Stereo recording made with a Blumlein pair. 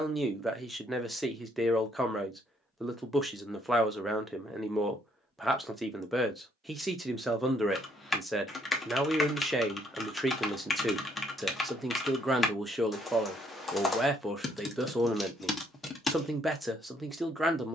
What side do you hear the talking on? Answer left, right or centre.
centre.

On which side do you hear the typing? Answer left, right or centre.
centre.